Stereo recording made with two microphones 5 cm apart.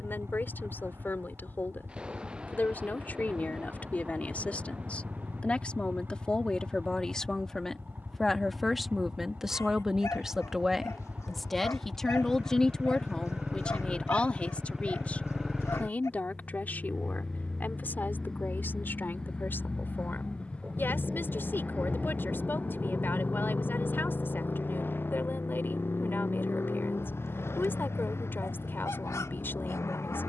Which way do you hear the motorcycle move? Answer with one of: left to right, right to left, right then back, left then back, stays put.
right to left.